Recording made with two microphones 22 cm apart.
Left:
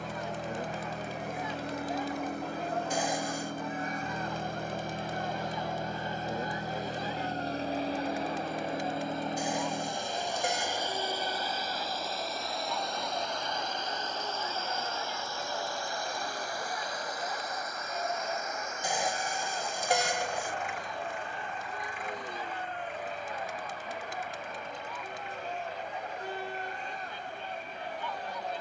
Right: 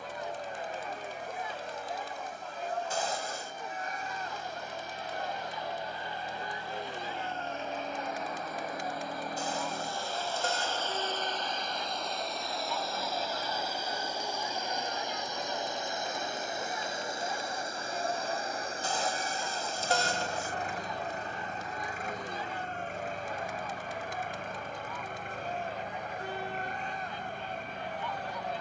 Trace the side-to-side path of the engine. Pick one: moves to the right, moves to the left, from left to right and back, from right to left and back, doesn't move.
moves to the right.